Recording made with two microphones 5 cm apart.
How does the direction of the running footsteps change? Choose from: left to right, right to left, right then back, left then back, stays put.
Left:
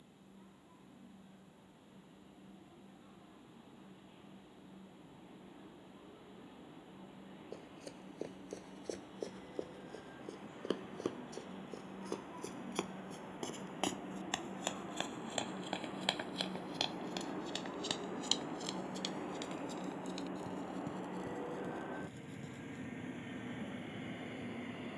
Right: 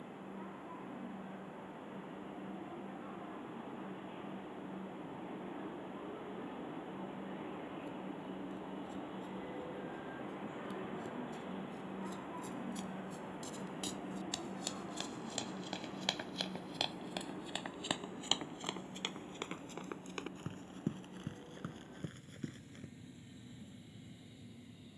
left to right.